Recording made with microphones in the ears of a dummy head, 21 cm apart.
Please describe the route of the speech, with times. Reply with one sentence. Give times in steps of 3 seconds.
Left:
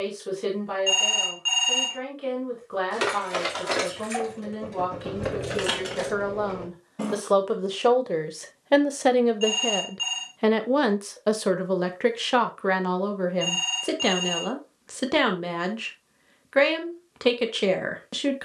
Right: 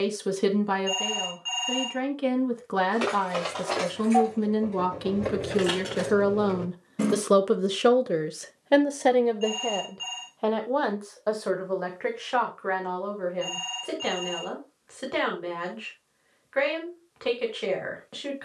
You can hear the speech on the right from 0 s and on the left from 9 s.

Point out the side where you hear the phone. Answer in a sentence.
In this clip you hear the phone on the left.